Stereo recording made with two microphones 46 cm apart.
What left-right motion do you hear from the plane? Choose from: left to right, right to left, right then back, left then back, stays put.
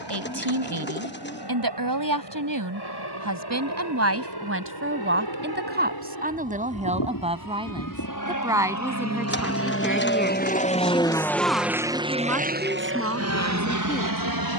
left to right.